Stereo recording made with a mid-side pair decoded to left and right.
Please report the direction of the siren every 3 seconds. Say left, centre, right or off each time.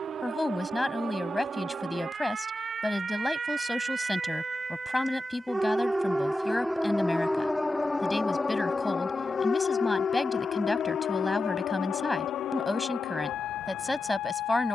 right, right, centre, left, left.